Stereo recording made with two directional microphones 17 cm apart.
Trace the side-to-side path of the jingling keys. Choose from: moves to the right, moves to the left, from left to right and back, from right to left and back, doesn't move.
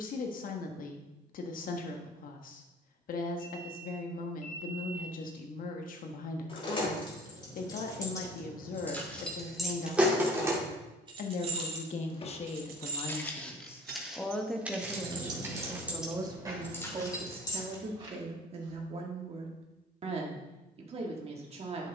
from left to right and back.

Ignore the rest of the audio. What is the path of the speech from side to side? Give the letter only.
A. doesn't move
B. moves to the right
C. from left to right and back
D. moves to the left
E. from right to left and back
B.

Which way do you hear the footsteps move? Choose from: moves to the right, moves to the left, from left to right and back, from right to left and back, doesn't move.
moves to the right.